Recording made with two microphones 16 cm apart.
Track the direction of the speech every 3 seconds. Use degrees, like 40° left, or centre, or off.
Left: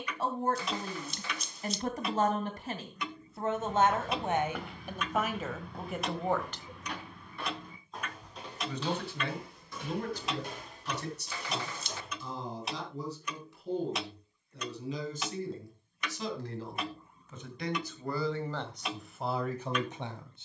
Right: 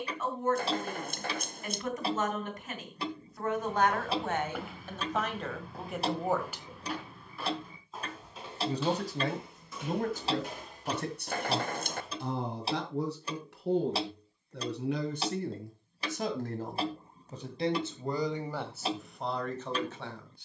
30° left, 10° left, 20° right, 50° right, 70° right, 50° right, centre.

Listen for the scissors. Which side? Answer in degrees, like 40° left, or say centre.
50° right.